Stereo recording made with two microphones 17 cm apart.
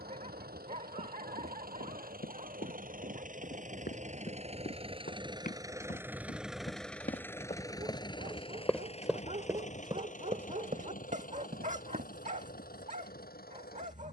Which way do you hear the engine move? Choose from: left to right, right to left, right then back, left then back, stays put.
right to left.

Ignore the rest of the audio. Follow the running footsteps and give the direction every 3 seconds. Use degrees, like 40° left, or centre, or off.
70° left, 60° left, 30° left, 40° right, off.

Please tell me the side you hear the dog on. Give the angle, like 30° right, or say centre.
50° right.